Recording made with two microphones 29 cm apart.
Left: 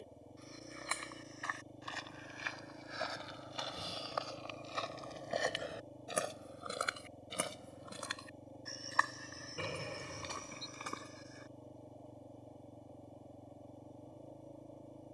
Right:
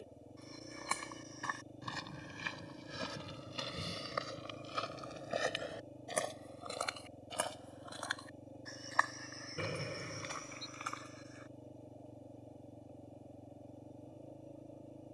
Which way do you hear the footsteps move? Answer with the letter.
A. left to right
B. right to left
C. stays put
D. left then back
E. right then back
B.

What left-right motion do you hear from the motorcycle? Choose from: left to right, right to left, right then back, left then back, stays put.
stays put.